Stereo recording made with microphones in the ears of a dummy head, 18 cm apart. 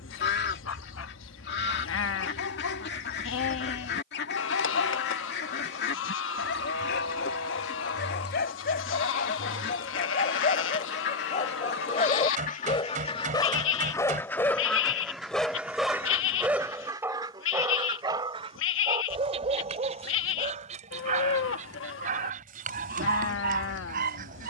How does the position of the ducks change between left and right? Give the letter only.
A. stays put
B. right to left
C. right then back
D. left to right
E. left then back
D.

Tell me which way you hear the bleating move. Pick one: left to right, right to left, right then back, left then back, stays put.
stays put.